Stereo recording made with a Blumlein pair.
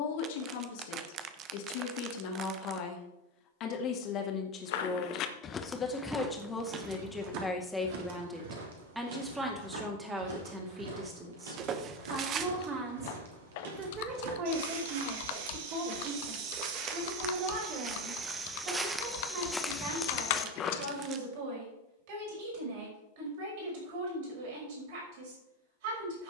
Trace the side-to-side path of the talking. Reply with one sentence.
You can hear the talking travel towards the right.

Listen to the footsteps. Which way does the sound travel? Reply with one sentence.
In this clip you hear the footsteps move from left to right and back again.